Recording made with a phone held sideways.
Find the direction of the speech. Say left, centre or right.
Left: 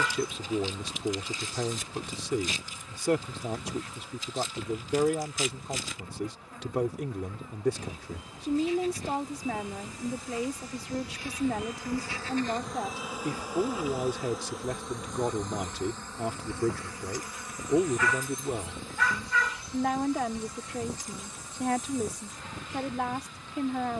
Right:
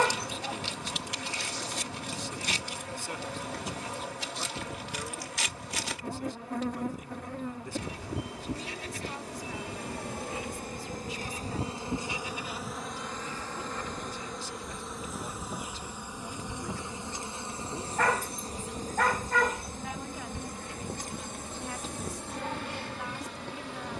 left.